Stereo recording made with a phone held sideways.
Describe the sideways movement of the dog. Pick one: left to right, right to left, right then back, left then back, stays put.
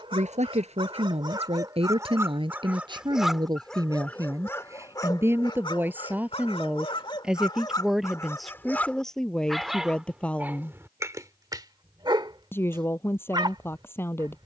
left then back.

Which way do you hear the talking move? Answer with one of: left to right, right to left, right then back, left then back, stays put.
right to left.